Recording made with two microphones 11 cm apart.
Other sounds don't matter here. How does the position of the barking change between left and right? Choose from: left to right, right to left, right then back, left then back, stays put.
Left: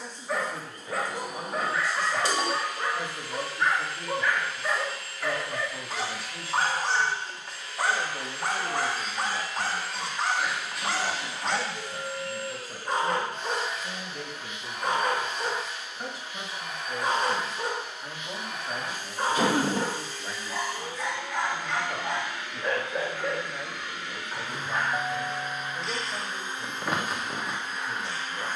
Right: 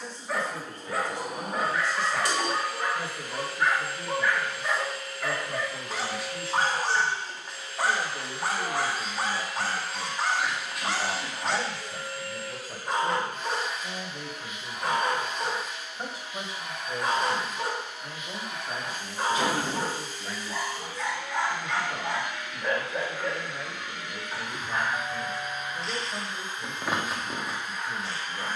stays put.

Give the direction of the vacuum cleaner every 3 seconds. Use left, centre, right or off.
right, right, right, centre, left, left, left, left, left, left.